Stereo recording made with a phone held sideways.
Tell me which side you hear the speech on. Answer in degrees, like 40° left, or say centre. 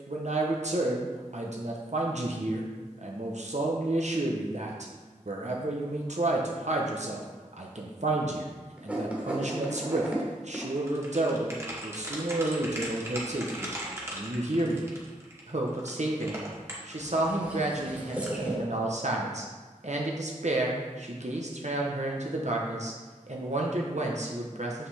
60° right.